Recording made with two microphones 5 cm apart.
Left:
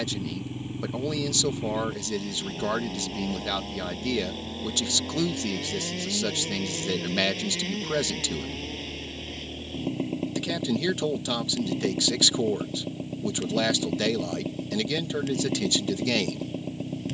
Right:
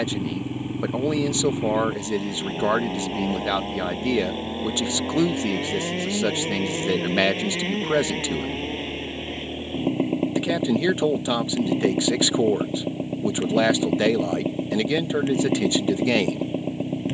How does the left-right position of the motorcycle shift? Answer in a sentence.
You can hear the motorcycle stay in one place.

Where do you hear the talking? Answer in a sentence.
In this clip you hear the talking on the right.